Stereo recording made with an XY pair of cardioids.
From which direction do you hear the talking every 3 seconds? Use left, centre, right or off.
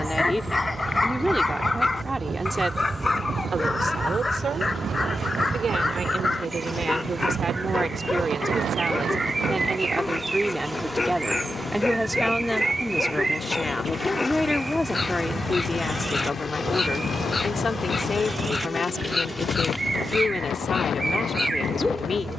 centre, right, right, centre, centre, left, left, left.